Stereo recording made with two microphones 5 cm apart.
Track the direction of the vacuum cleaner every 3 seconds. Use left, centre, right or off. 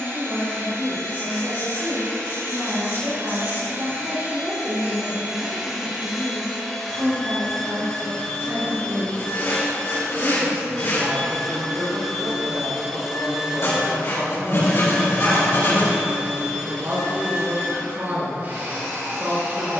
right, right, centre, centre, centre, right, right.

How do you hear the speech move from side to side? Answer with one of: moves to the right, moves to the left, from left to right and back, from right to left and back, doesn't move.
doesn't move.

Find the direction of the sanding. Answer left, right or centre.
left.